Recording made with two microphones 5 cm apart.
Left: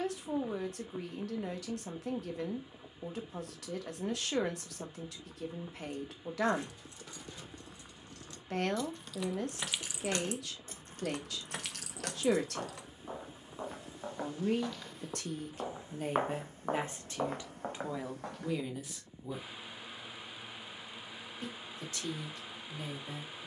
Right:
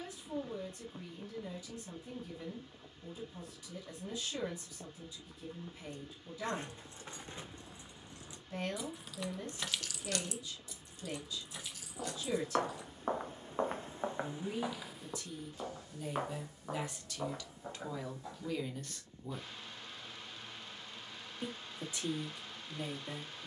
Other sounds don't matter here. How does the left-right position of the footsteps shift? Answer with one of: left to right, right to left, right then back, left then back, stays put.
right to left.